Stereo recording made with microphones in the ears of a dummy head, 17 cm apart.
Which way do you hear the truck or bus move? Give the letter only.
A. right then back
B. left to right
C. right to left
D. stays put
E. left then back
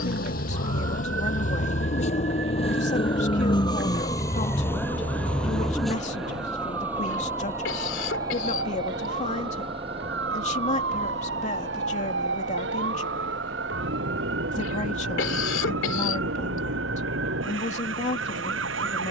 B.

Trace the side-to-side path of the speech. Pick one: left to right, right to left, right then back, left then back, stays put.
stays put.